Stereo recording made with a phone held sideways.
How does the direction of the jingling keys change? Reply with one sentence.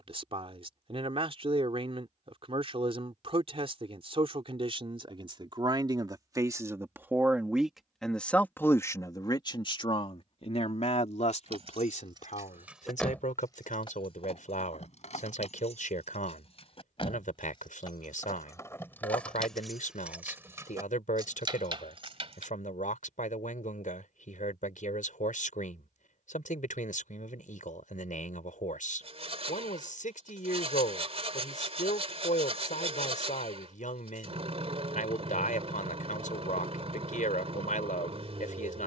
In this clip you hear the jingling keys move from right to left and back again.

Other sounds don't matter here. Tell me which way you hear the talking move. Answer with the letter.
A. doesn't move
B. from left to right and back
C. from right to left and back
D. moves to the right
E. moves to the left
E.